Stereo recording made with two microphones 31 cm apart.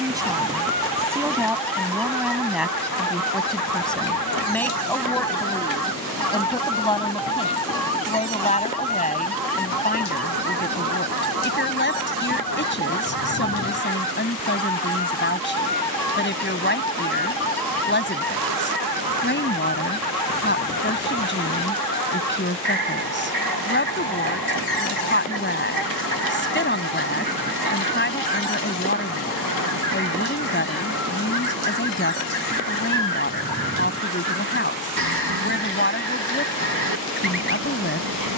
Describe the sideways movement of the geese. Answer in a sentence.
You can hear the geese stay put.